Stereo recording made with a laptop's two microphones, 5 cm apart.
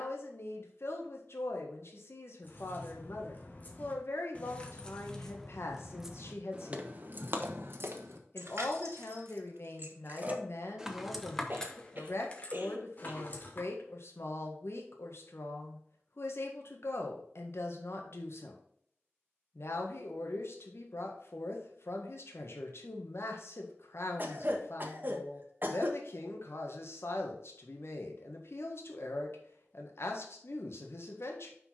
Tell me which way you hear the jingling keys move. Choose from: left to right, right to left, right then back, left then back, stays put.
right then back.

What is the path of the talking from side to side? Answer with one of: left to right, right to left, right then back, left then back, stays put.
stays put.